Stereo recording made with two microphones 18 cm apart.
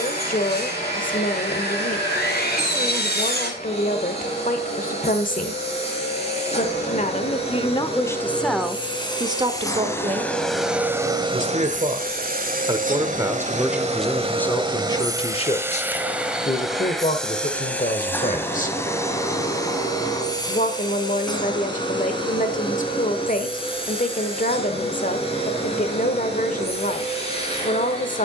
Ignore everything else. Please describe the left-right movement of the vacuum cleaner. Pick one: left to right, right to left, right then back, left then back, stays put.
right then back.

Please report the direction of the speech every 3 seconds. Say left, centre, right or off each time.
left, left, left, right, centre, left, left, left, left, left.